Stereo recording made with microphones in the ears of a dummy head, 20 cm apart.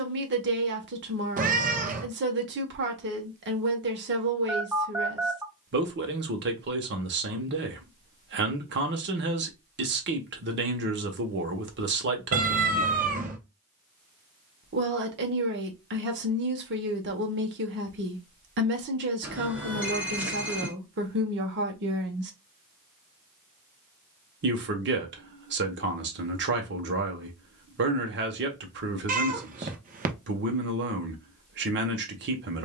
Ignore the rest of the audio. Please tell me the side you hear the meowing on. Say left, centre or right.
right.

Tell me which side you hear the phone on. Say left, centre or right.
centre.